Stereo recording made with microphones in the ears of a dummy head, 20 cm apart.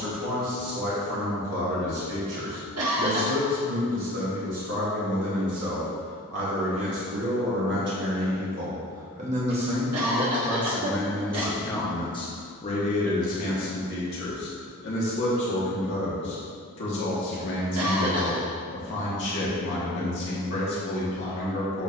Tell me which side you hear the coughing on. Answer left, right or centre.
right.